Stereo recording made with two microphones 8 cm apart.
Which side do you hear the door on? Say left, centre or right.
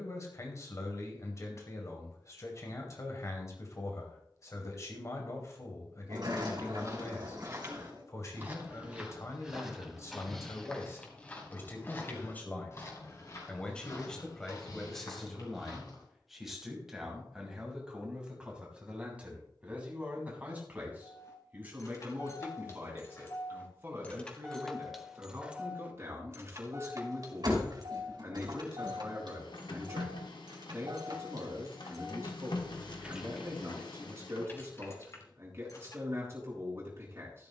right.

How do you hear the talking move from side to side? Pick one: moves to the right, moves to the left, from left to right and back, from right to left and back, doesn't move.
moves to the right.